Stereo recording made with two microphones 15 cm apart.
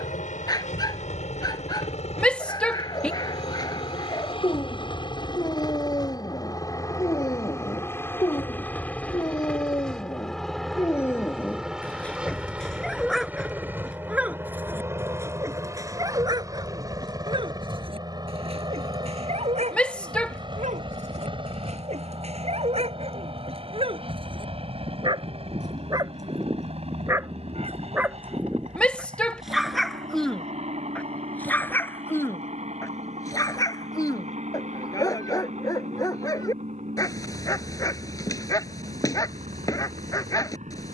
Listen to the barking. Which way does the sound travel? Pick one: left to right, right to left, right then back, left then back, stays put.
right then back.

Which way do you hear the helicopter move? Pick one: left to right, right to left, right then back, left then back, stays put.
left to right.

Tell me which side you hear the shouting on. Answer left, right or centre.
centre.